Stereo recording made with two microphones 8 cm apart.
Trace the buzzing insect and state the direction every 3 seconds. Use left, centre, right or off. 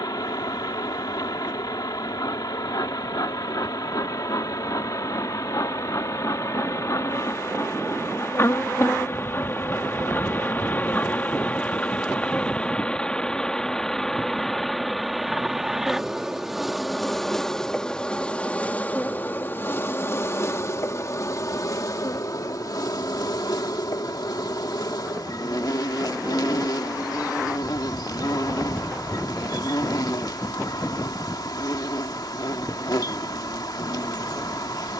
left, left, left, left, centre, centre, left, left, left, left, left, left.